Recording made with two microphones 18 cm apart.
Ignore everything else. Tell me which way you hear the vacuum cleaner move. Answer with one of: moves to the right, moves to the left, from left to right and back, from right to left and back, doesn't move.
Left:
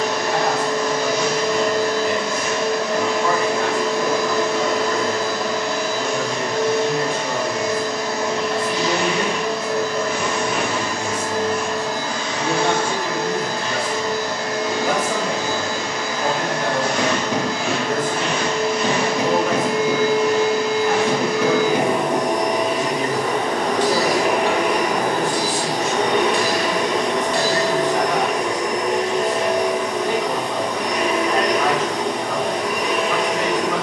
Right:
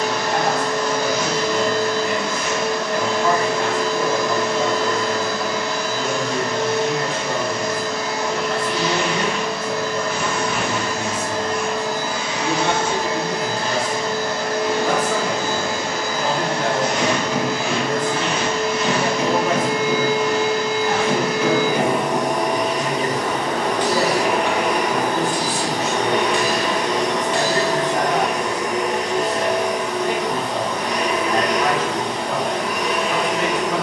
from left to right and back.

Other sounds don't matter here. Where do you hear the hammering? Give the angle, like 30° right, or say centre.
40° left.